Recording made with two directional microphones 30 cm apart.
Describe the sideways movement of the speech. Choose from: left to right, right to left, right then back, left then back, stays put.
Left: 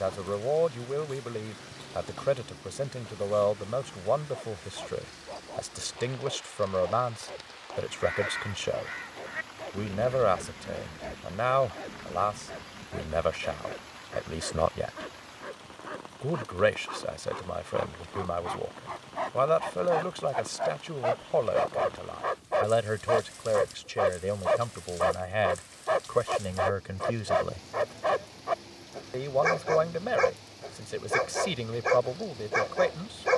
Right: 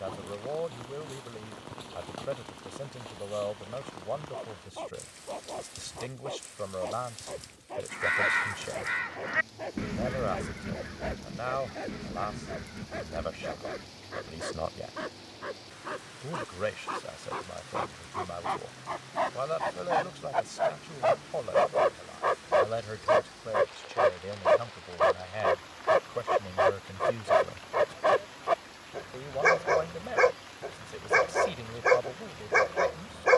stays put.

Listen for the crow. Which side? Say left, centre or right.
right.